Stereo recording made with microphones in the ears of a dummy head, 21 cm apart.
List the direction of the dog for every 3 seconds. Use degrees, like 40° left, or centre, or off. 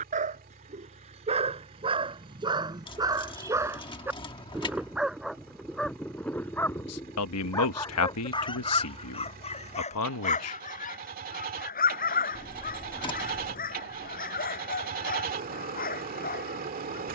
20° right, 10° right, 10° left, 30° left, 40° left, 40° left.